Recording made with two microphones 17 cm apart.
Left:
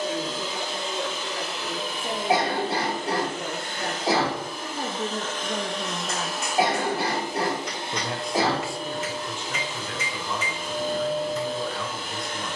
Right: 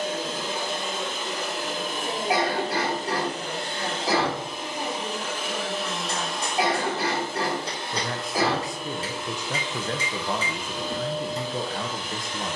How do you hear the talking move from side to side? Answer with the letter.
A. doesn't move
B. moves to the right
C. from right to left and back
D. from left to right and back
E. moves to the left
B.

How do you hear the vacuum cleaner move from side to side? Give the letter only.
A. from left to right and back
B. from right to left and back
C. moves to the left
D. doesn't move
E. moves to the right
C.